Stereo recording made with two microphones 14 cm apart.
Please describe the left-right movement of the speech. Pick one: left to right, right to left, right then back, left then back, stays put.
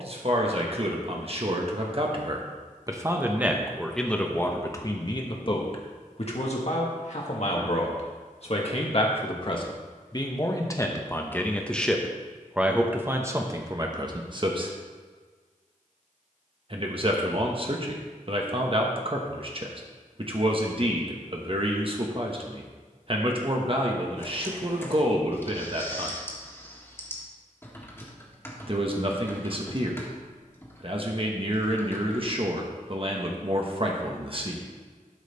left then back.